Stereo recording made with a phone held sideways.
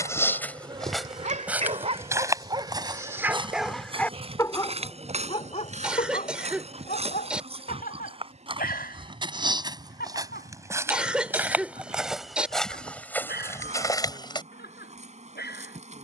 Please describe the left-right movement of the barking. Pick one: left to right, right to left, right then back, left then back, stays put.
right to left.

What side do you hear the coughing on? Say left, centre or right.
centre.